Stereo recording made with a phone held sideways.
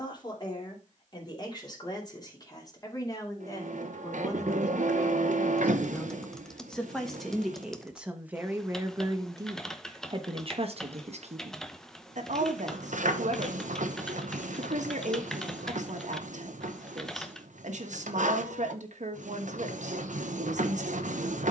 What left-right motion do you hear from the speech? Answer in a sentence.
In this clip you hear the speech travel towards the right.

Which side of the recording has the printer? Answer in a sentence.
You can hear the printer on the right.